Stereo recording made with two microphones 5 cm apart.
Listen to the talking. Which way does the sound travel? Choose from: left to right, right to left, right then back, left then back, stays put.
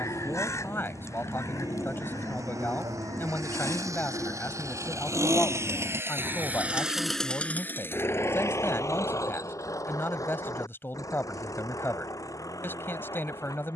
stays put.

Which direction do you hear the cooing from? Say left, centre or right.
left.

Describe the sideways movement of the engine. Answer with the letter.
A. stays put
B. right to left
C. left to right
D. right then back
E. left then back
B.